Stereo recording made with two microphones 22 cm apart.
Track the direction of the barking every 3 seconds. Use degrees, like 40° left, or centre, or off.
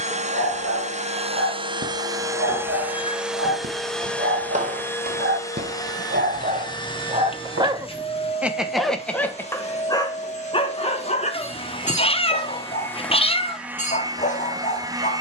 80° right, 60° right, 20° right, 20° left, 30° left.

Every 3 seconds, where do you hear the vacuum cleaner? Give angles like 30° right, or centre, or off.
20° right, 10° left, 20° left, 30° left, centre.